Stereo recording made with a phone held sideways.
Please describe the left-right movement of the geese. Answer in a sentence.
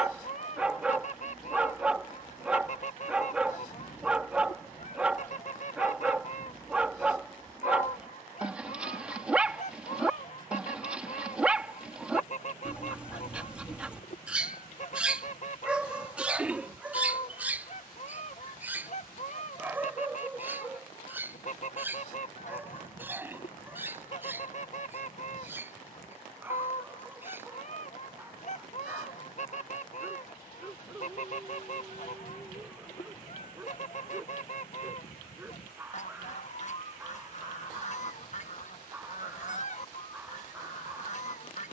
You can hear the geese stay put.